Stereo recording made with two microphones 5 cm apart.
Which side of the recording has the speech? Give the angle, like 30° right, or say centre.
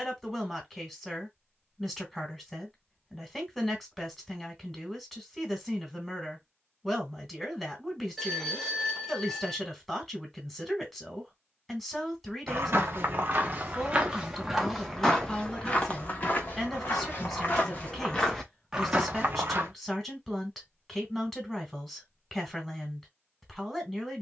10° left.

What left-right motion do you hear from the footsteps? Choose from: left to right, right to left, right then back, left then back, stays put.
left then back.